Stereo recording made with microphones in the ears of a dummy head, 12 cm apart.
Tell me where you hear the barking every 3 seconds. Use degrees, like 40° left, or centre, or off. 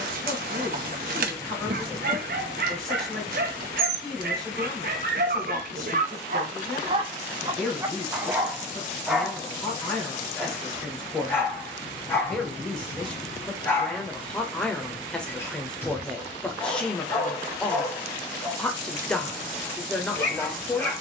70° right, 70° right, 30° right, 10° left, 20° left, 20° left, 20° left.